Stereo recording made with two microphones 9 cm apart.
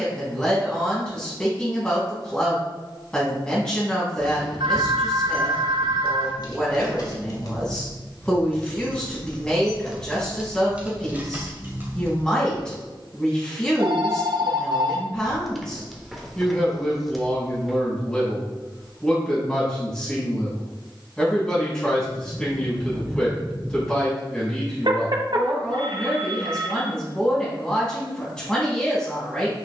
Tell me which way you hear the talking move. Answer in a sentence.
You can hear the talking stay put.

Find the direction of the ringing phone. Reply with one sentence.
You can hear the ringing phone on the right.